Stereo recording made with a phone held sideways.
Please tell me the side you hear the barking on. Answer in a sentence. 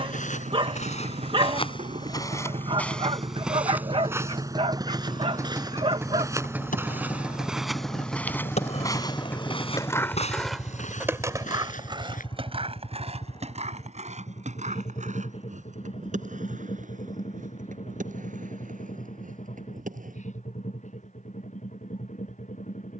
In this clip you hear the barking on the right.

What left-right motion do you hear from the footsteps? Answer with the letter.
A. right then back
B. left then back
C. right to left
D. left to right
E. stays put
A.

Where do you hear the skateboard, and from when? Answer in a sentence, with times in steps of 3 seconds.
You can hear the skateboard not at all from 0 s, on the left from 6 s, in the centre from 9 s, on the right from 12 s and not at all from 21 s.